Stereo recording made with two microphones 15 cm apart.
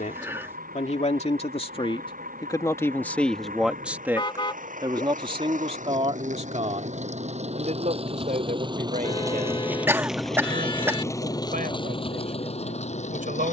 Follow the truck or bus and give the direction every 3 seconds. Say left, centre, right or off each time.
right, right, right, centre, left.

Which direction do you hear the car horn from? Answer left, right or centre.
left.